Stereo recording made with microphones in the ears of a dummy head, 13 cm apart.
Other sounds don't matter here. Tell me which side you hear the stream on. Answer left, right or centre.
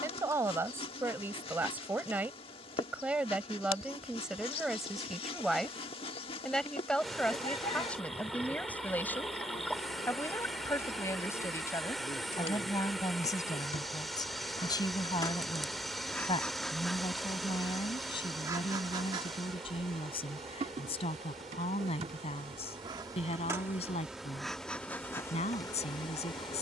centre.